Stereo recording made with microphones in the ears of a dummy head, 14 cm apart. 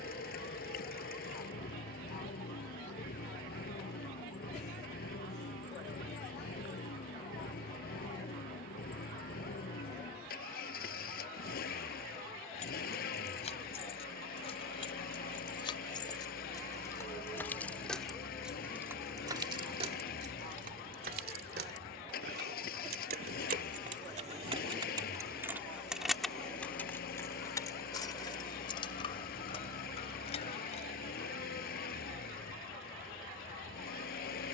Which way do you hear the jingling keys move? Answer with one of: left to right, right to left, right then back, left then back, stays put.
right then back.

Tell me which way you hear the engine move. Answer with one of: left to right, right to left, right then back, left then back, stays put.
stays put.